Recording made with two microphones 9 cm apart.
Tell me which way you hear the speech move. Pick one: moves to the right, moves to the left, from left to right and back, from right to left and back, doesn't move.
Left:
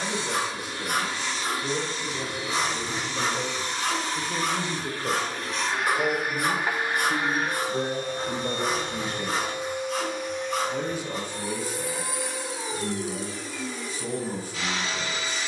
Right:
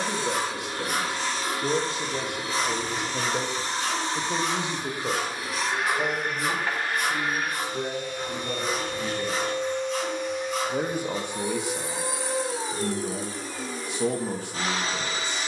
from right to left and back.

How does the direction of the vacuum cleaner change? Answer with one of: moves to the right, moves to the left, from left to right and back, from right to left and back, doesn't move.
from right to left and back.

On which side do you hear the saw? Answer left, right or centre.
left.